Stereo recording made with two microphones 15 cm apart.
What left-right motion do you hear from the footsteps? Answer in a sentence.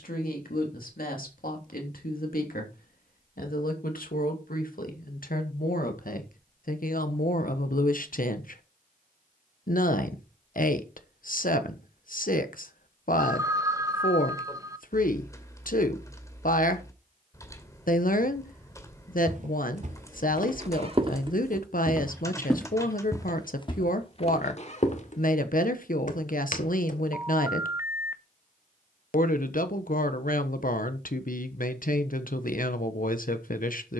You can hear the footsteps move to the left.